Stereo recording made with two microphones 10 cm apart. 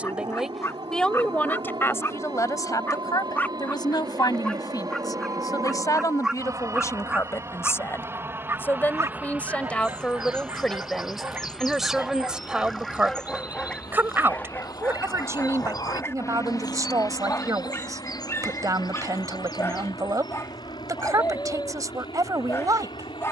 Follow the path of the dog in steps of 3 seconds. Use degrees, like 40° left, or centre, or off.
30° left, 10° left, 20° right, 30° right, 10° left, 30° left, 30° left, 30° left.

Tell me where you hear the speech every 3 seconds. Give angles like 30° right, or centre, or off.
20° left, 40° left, 30° left, 10° left, 20° right, 40° right, 40° right, 40° right.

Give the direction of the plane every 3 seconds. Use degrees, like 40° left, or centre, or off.
60° right, 50° right, 30° right, 10° right, 10° left, 40° left, 50° left, 60° left.